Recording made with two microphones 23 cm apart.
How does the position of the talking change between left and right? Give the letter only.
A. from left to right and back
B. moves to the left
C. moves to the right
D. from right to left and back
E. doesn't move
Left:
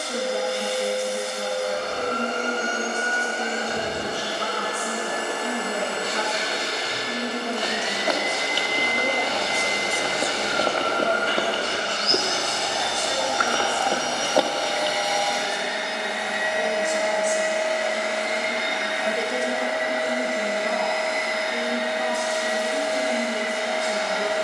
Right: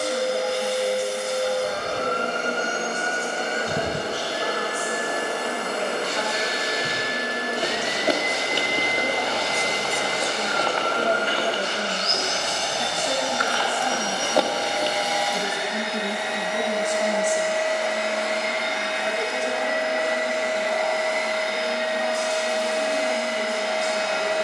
A.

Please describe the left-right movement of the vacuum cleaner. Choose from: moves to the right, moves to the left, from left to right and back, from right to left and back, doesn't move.
moves to the left.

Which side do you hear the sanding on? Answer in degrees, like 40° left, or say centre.
50° left.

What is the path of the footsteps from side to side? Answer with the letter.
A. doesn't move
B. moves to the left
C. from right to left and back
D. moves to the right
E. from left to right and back
C.